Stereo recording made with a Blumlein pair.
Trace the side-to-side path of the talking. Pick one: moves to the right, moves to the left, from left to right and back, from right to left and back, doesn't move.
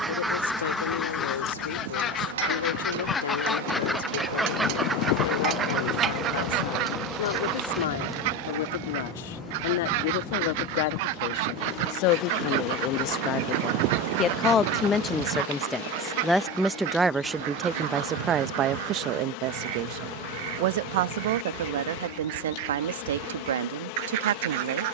moves to the right.